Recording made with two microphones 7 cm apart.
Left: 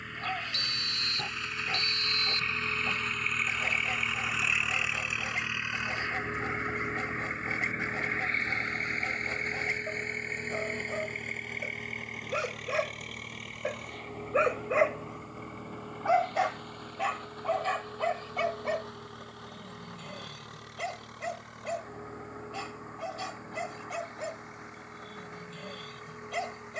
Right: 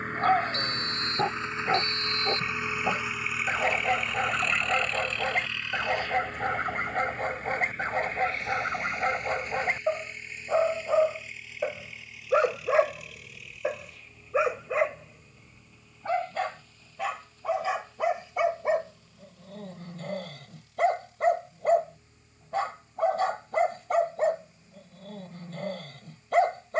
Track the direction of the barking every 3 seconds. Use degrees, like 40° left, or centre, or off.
50° right, 50° right, 50° right, 50° right, 20° right, centre, 40° right, 50° right, 50° right.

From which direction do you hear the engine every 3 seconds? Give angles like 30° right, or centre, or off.
30° right, centre, 30° left, 50° left, 50° left, 60° left, 60° left, 70° left, 70° left.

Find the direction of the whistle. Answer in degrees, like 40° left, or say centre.
40° right.